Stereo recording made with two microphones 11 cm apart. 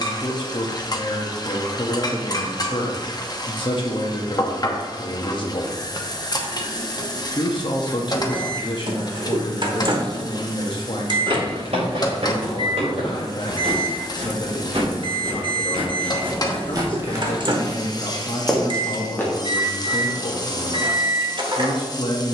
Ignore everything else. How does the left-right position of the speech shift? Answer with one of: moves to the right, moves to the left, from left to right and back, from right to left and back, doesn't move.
doesn't move.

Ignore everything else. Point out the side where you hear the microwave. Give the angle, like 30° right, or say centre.
50° right.